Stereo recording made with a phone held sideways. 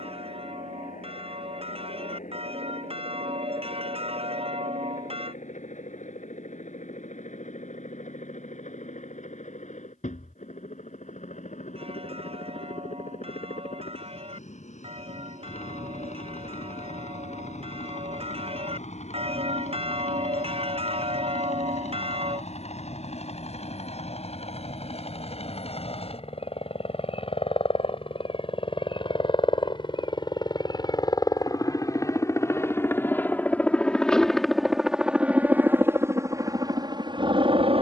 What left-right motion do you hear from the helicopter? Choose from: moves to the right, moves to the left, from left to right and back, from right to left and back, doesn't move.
moves to the right.